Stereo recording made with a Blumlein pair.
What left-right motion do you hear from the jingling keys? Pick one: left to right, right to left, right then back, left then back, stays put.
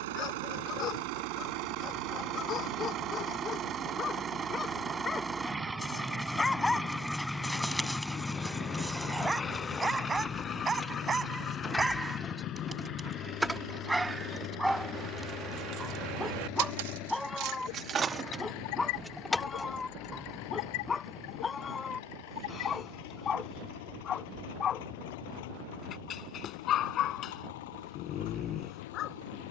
right then back.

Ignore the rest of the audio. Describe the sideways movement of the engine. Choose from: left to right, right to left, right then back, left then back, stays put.
right to left.